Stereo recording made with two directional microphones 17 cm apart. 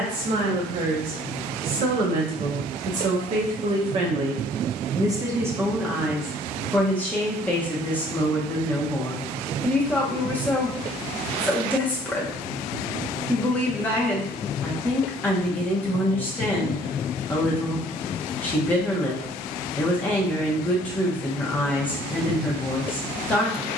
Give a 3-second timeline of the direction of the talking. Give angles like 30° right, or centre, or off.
60° right, 30° right, 10° left, 10° left, 10° left, 10° left, 10° left, 10° left.